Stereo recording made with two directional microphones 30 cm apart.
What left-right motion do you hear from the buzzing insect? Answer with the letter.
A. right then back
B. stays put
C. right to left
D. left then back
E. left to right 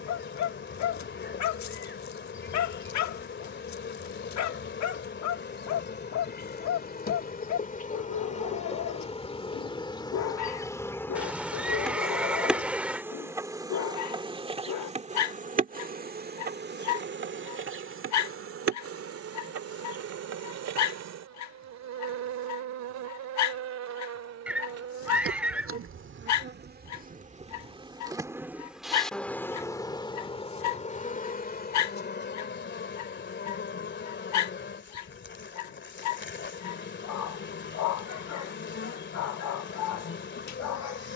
A.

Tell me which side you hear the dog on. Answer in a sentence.
You can hear the dog on the left.